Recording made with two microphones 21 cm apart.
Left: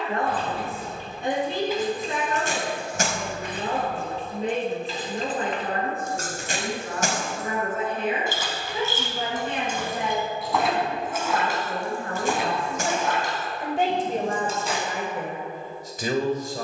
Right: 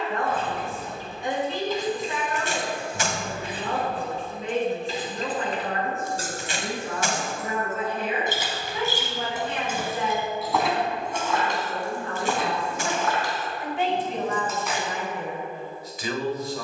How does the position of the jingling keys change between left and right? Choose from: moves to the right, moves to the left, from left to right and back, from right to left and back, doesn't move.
from left to right and back.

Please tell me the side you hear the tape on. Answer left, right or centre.
left.